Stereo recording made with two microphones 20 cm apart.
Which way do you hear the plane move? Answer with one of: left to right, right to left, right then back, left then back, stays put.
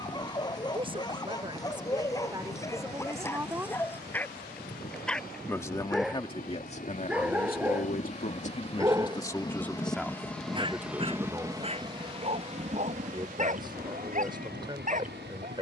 left to right.